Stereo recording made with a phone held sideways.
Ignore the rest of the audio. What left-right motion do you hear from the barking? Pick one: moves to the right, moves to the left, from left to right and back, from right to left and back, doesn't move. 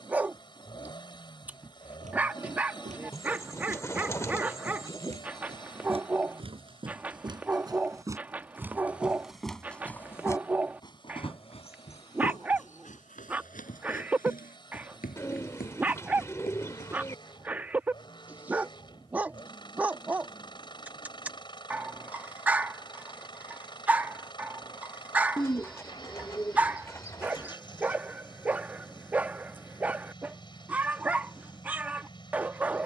doesn't move.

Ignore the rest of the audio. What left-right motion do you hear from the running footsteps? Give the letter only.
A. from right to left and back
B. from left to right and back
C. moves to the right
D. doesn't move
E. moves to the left
E.